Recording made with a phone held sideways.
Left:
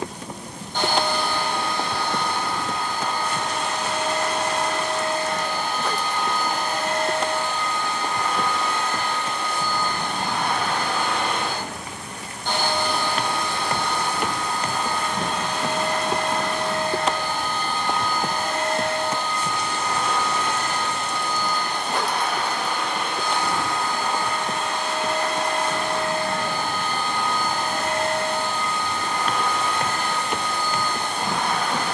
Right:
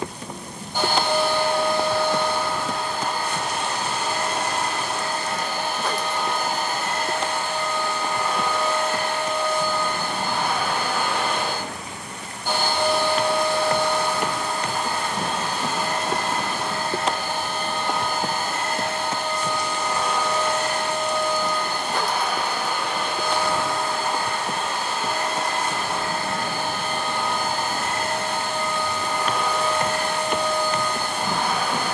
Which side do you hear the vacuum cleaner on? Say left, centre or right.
centre.